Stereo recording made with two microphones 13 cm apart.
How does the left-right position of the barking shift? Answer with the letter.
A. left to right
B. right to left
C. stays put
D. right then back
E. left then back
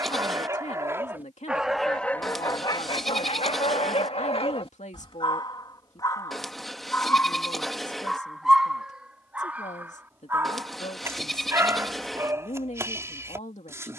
E.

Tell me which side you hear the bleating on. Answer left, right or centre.
centre.